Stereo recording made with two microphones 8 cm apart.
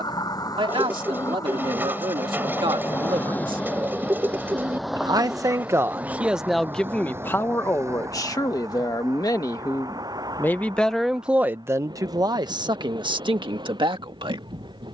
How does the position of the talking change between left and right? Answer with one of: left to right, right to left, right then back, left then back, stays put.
left then back.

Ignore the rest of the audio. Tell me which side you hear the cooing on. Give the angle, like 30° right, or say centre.
20° right.